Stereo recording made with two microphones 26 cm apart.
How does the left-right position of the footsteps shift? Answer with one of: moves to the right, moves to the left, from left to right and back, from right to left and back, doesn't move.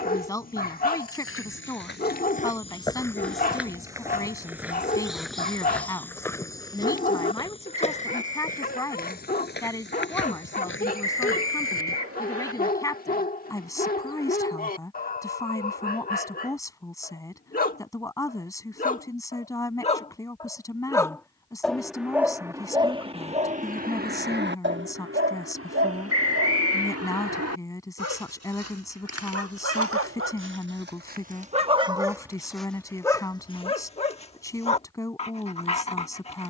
from left to right and back.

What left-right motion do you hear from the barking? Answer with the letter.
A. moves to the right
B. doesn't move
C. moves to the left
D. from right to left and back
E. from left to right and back
E.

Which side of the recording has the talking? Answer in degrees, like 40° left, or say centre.
10° left.